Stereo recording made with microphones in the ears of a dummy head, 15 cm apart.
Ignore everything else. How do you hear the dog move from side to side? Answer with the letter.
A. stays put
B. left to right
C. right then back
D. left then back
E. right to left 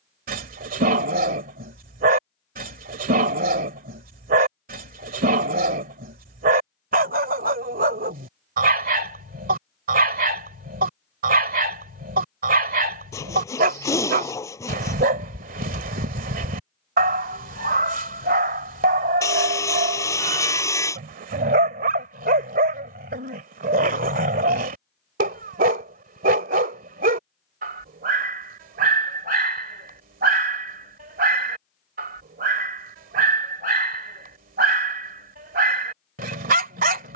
A.